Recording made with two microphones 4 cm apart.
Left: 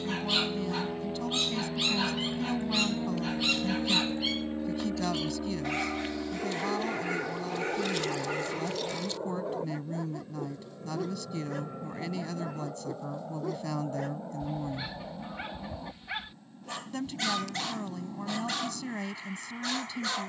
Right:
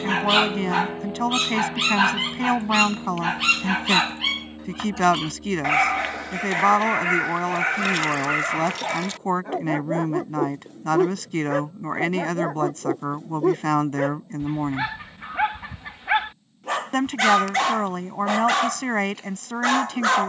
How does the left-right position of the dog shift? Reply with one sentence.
In this clip you hear the dog stay put.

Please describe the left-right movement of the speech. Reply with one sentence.
In this clip you hear the speech stay in one place.